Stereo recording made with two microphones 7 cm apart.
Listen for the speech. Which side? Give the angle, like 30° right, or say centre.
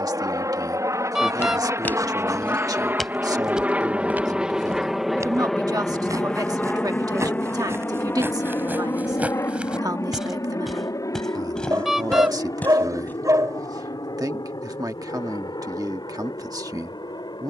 60° right.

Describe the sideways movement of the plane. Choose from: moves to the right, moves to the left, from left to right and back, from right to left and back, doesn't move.
moves to the left.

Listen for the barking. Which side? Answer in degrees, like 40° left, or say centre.
50° right.